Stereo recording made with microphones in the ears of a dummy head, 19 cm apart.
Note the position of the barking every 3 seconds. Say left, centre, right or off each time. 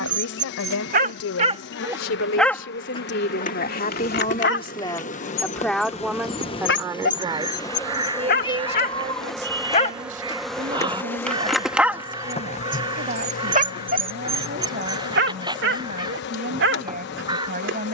right, left, left, centre, right, right.